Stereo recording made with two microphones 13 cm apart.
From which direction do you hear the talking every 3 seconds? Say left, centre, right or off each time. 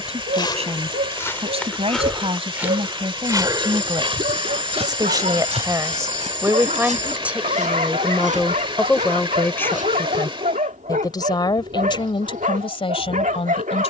right, right, centre, left, left.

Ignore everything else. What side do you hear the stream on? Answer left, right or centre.
right.